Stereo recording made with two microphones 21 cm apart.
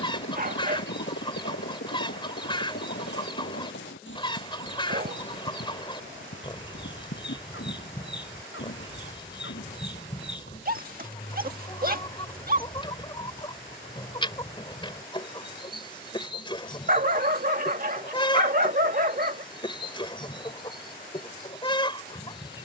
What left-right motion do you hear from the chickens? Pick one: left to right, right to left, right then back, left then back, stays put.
stays put.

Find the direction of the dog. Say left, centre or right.
right.